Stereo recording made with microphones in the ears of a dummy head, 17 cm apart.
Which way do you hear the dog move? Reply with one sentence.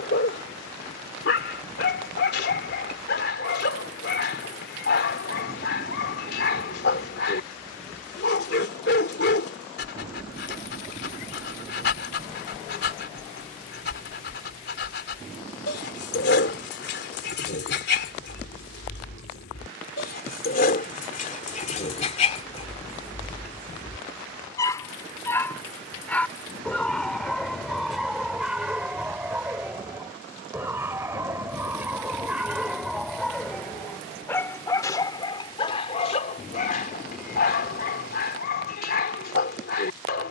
You can hear the dog go right and come back.